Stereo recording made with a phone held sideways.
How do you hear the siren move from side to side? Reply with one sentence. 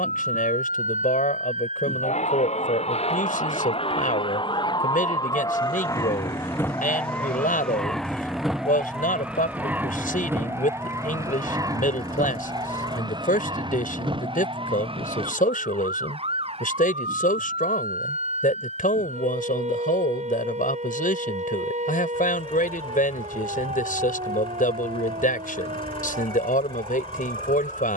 In this clip you hear the siren move from left to right.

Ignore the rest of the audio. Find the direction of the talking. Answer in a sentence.
You can hear the talking on the left.